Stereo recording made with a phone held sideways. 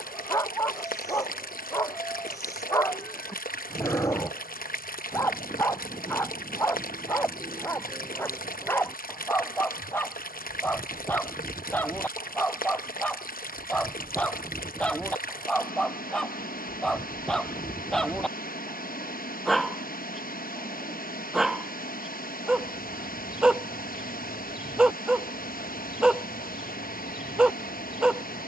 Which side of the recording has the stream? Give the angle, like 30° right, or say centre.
70° left.